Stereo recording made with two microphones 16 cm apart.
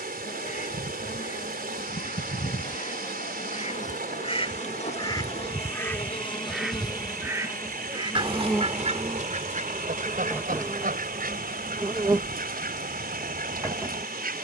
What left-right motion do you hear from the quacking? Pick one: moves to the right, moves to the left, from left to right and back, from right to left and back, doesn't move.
moves to the right.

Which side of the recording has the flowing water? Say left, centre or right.
right.